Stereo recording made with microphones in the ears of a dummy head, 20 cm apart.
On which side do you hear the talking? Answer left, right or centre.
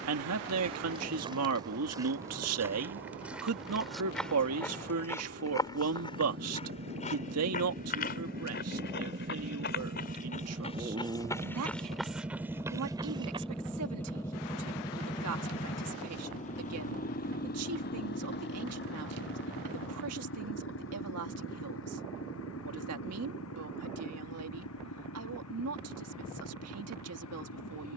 right.